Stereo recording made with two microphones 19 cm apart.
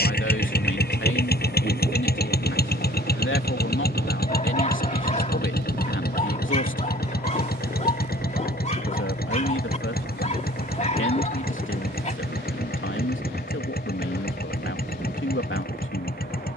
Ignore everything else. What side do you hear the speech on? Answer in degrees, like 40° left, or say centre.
90° left.